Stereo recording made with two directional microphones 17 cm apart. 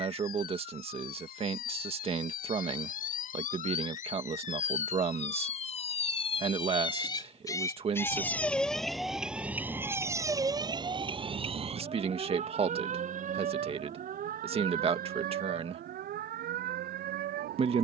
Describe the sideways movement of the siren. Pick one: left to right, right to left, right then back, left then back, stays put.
left to right.